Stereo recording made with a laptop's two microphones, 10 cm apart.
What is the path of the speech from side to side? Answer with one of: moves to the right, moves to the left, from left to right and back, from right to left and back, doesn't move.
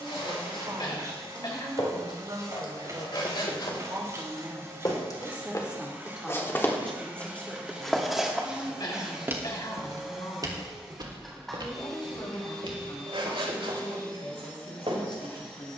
moves to the left.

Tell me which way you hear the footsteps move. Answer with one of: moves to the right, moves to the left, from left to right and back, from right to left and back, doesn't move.
moves to the right.